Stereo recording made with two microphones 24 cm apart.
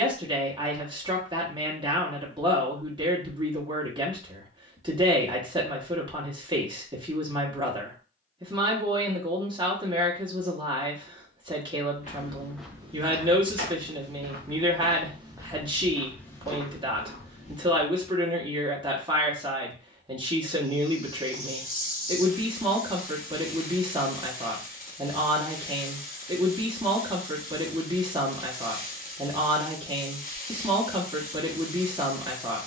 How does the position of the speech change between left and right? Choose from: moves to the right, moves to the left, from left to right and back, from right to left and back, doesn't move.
doesn't move.